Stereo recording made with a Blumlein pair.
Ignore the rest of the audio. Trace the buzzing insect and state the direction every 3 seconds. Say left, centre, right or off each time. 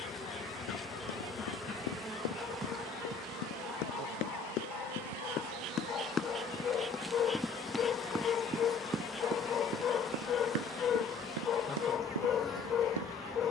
centre, right, centre, centre, centre.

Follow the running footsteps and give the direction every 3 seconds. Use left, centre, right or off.
left, left, centre, right, right.